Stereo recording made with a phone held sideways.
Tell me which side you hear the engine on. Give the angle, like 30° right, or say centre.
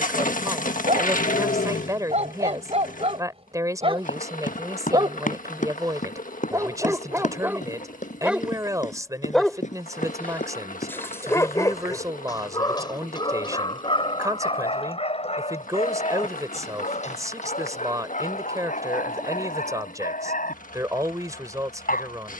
60° left.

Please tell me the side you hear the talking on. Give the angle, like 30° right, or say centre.
20° right.